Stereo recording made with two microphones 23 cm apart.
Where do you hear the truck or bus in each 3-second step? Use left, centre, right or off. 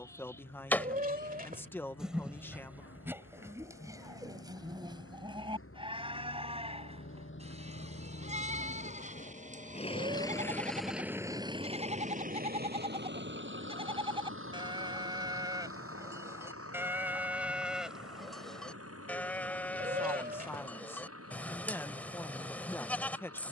left, left, left, centre, right, right, right, right.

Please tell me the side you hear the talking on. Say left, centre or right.
centre.